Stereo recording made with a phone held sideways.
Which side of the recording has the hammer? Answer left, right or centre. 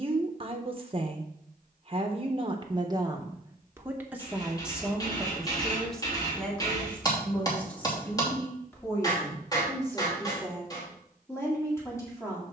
left.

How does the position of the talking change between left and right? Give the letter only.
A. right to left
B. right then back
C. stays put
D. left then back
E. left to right
A.